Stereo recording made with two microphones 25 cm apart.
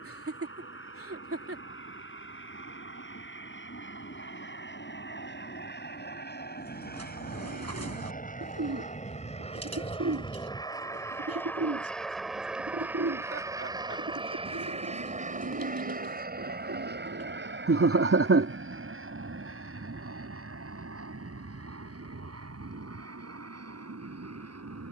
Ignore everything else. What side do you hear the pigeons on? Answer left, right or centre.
right.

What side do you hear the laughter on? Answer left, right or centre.
right.